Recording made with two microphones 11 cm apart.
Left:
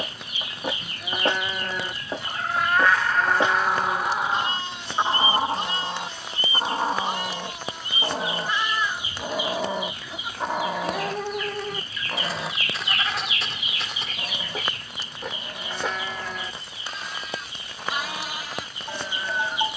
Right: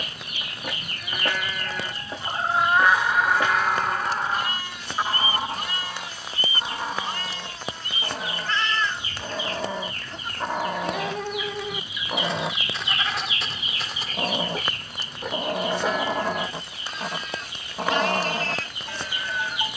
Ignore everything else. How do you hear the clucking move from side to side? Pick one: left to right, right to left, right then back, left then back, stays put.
left then back.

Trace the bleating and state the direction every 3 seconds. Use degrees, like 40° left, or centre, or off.
30° left, 30° left, 20° left, 10° left, centre, centre, 20° left.